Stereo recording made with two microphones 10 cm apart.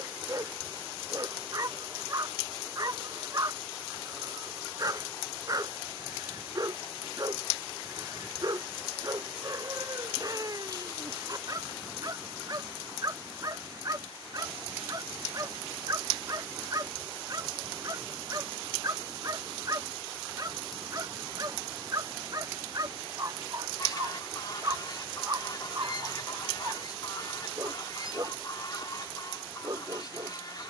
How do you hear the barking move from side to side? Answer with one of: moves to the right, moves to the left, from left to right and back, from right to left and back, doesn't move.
doesn't move.